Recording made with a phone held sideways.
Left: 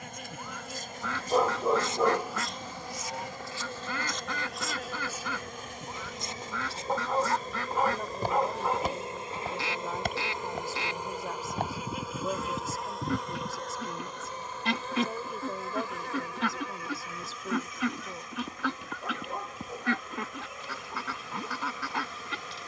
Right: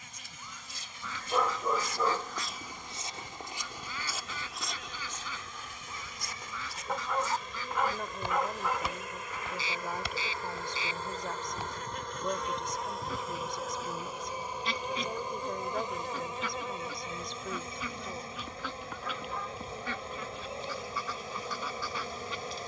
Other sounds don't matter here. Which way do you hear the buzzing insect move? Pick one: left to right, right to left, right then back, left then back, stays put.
left to right.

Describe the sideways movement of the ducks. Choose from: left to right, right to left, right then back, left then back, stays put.
stays put.